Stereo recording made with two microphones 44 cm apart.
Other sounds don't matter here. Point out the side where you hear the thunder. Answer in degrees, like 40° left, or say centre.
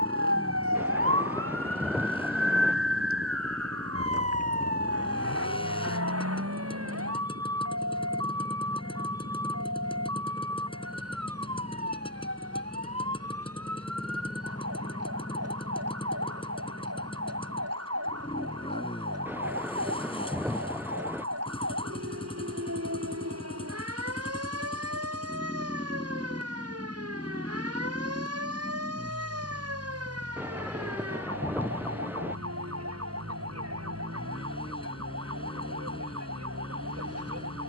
centre.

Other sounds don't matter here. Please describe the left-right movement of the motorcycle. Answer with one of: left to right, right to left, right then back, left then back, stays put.
stays put.